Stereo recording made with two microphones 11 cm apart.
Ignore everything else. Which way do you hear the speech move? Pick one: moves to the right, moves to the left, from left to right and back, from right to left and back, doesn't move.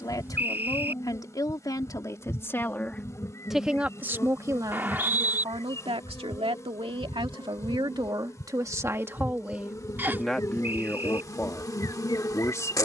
from left to right and back.